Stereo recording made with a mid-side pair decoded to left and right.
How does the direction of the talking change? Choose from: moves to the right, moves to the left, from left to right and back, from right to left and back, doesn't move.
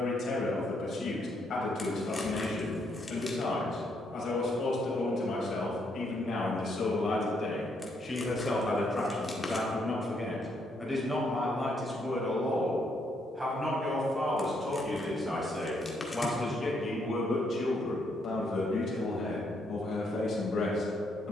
from left to right and back.